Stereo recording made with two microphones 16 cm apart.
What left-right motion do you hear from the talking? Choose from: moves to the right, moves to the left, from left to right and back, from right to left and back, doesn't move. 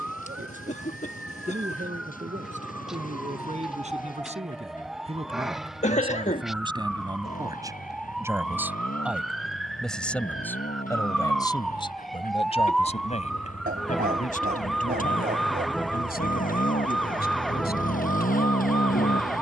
moves to the left.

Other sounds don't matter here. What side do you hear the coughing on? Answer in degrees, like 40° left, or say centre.
50° left.